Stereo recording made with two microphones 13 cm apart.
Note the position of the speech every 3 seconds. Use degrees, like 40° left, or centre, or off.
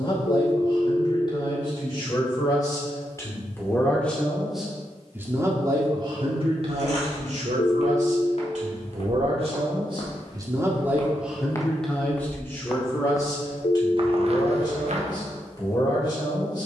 30° left, centre, 60° right, 20° right, 30° left, 30° left.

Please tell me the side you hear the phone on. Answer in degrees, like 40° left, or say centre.
50° left.